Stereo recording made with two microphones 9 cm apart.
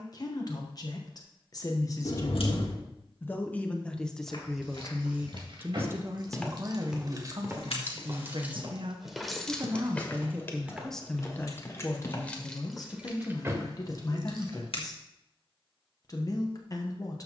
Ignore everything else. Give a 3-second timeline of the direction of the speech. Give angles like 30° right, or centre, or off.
40° left, centre, 50° right, 10° right, 40° left, 40° left.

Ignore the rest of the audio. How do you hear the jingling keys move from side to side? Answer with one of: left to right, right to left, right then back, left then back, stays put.
left then back.